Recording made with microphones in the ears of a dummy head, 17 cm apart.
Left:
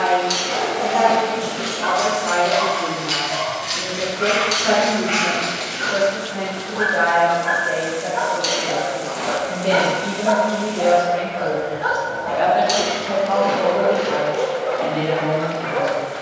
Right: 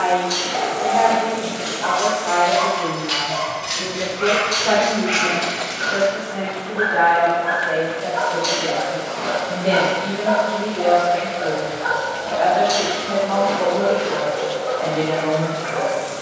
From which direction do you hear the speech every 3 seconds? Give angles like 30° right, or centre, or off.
60° left, 50° left, 10° left, 10° left, 40° left, 60° left.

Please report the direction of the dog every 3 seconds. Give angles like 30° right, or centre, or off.
50° left, centre, 10° left, 50° left, 50° left, 50° left.